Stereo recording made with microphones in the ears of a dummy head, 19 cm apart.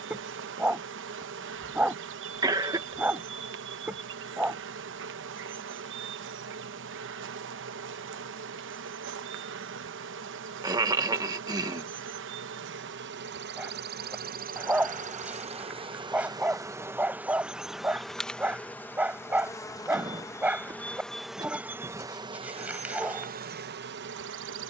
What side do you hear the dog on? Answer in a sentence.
In this clip you hear the dog in the centre.